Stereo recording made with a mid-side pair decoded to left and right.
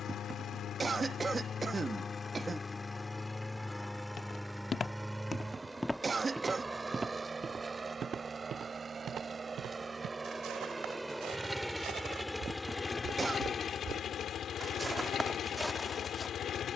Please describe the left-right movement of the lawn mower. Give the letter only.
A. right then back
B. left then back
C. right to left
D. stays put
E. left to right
A.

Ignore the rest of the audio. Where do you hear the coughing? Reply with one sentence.
In this clip you hear the coughing on the right.